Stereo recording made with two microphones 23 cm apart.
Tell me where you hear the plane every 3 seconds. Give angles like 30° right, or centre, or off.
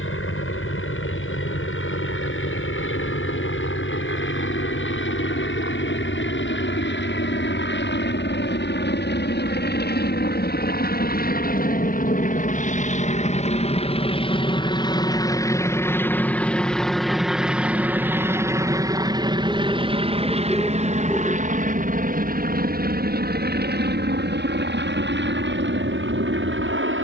70° left, 70° left, 60° left, 50° left, 30° left, centre, 20° right, 40° right, 50° right.